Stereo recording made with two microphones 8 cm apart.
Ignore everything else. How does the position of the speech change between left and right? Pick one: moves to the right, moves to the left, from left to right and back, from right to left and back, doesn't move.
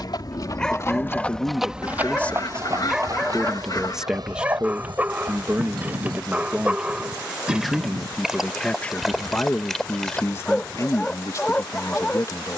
from left to right and back.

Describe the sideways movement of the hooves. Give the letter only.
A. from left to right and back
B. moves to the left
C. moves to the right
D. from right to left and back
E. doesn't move
C.